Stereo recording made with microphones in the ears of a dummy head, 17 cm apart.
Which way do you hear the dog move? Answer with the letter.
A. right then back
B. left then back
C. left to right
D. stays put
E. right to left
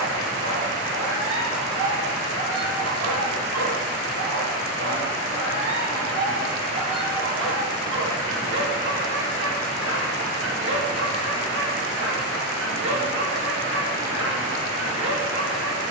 D.